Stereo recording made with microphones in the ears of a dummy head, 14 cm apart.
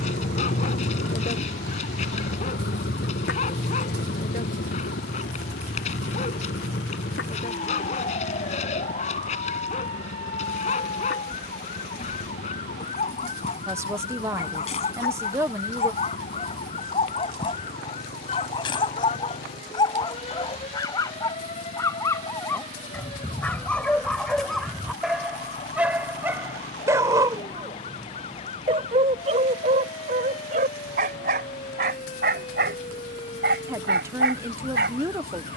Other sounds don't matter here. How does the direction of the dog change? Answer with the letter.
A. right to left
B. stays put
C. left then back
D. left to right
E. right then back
D.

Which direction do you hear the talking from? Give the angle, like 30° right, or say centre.
20° right.